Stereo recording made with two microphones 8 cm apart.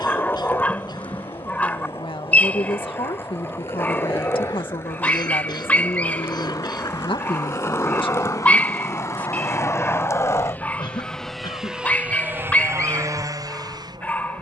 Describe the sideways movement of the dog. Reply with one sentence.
You can hear the dog stay put.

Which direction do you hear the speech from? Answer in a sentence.
You can hear the speech on the left.